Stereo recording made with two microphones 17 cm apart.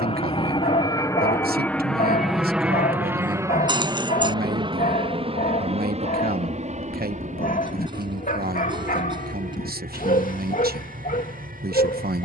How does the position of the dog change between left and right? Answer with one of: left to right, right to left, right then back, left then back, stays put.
stays put.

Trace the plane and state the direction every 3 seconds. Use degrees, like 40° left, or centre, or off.
10° left, 20° right, 40° right, 50° right.